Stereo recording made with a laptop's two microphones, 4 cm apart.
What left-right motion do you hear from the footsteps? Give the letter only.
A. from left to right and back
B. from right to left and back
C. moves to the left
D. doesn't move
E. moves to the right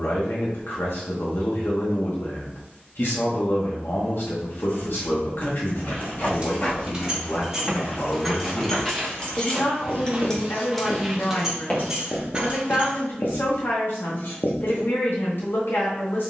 A.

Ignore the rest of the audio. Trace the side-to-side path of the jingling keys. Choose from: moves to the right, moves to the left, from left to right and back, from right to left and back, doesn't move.
from right to left and back.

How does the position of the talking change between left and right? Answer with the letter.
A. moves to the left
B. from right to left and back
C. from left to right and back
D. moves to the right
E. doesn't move
E.